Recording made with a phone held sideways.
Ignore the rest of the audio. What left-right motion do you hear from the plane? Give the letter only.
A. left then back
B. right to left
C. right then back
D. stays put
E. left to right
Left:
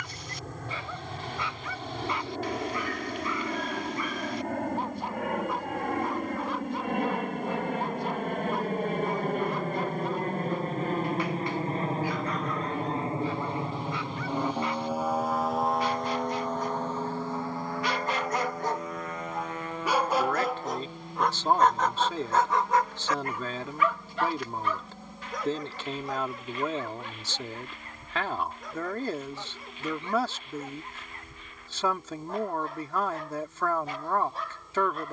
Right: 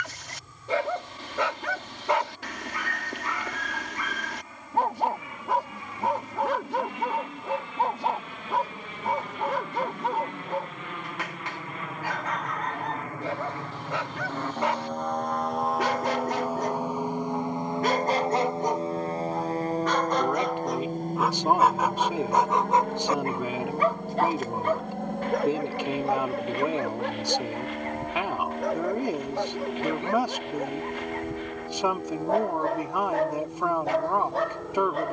E.